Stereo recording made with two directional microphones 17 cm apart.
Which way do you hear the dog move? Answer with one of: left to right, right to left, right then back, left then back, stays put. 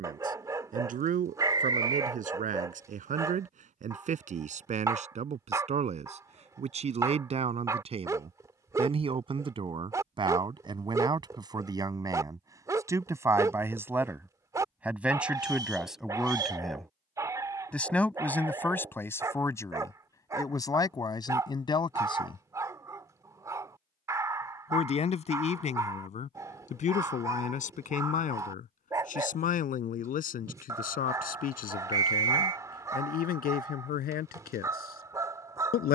stays put.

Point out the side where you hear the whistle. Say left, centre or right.
right.